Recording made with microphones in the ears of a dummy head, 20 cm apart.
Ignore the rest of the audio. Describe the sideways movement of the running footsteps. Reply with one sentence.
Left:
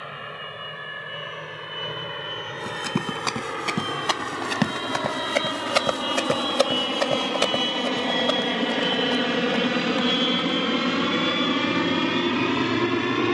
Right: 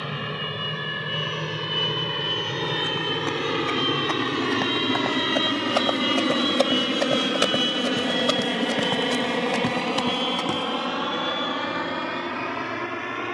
You can hear the running footsteps go from the left side to the right.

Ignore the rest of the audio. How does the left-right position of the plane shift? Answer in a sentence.
You can hear the plane travel towards the left.